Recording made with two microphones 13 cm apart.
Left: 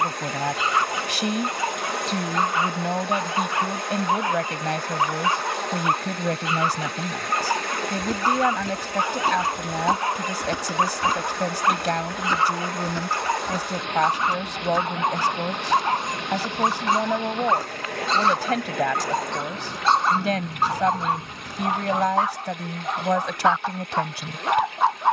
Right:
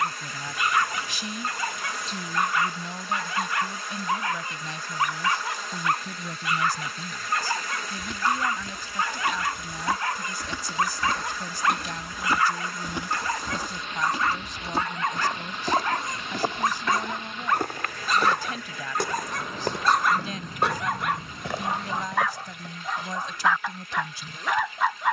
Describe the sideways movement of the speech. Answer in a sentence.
You can hear the speech stay put.